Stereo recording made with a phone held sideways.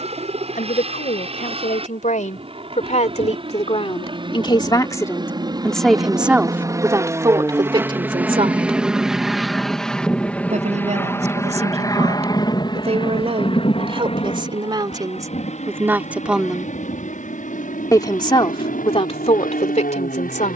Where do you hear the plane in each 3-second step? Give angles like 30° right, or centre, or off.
50° right, 40° right, 20° right, 10° left, 40° left, 50° left, 60° left.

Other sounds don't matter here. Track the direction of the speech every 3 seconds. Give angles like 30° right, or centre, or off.
70° left, 30° left, 20° right, 50° right, 40° right, 10° right, 50° left.